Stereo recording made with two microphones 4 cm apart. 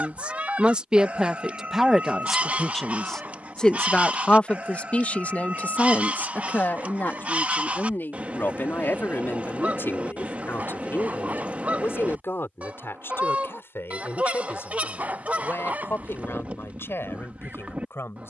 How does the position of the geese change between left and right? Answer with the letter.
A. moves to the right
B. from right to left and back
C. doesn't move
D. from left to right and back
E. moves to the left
C.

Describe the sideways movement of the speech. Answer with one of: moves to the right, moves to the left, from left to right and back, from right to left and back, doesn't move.
moves to the left.